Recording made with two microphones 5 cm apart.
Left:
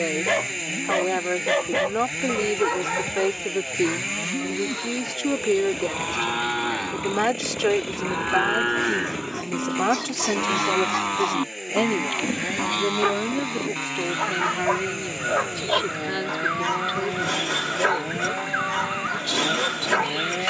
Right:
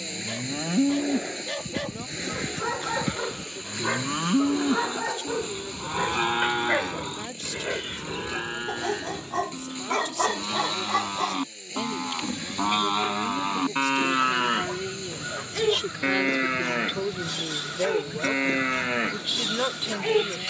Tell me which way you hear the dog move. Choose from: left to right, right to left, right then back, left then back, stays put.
right then back.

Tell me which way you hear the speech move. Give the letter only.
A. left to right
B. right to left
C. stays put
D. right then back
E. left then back
A.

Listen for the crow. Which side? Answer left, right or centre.
left.